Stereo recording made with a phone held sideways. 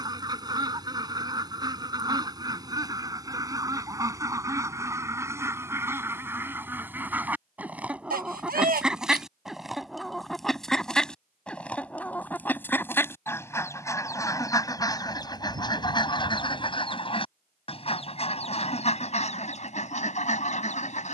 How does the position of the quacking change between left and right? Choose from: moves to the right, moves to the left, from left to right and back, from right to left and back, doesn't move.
moves to the left.